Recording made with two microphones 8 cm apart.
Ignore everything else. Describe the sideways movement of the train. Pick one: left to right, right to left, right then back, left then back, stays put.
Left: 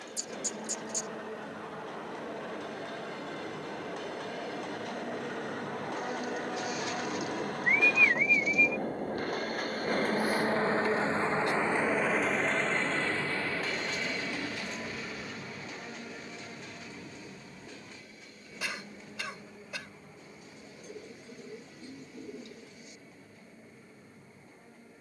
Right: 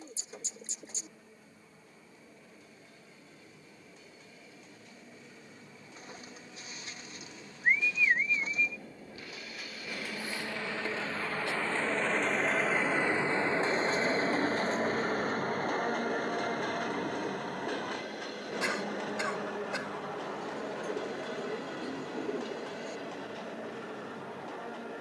left to right.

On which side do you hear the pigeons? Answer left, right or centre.
right.